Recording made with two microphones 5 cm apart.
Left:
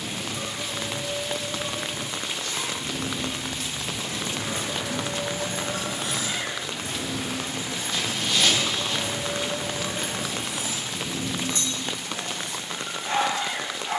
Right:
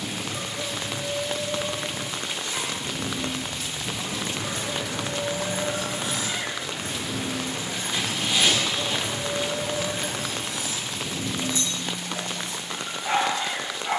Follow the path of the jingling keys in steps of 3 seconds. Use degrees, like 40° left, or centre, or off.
off, 20° left, 50° right, 10° left, 60° left.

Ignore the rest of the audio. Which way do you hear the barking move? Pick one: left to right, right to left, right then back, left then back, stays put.
stays put.